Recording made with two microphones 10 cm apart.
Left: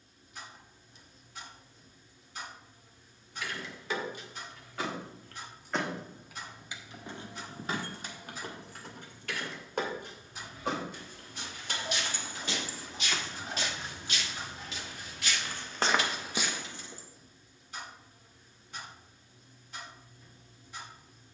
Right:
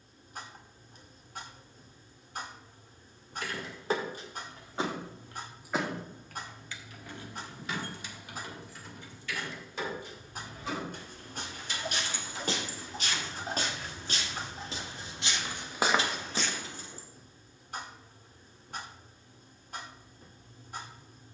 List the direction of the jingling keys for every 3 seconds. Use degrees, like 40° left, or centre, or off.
off, 30° right, 40° left, 60° left, 30° left, 30° right, off.